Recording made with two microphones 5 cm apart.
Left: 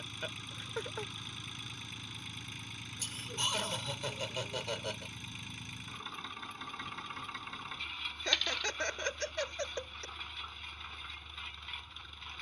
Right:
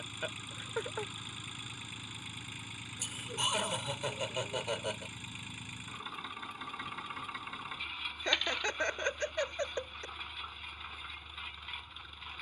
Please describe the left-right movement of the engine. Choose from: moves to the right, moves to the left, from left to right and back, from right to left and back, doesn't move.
doesn't move.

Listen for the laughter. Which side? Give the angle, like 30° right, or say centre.
10° right.